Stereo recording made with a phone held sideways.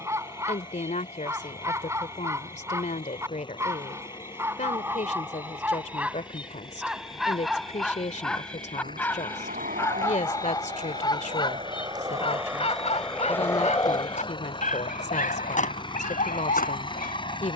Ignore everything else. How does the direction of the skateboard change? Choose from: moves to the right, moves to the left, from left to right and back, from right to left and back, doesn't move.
moves to the left.